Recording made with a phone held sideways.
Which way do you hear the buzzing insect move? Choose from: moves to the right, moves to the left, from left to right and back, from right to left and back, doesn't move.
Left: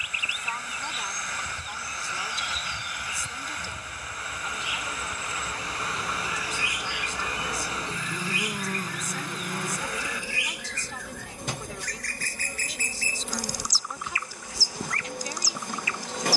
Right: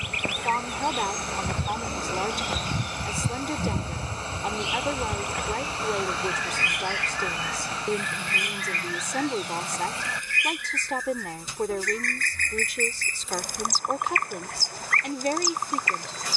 moves to the left.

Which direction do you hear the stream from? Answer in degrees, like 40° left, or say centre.
30° right.